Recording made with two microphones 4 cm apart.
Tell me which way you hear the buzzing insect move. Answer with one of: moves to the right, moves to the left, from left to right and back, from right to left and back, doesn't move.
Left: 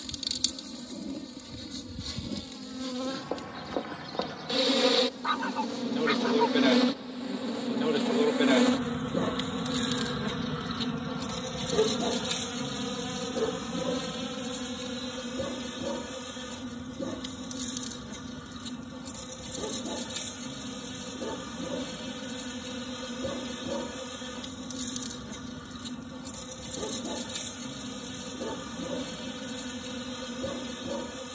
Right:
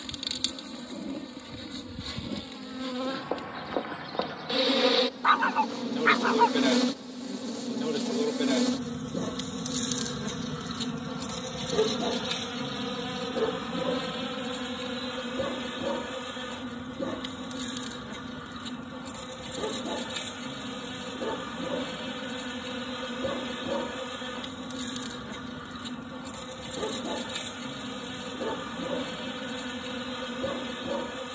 from right to left and back.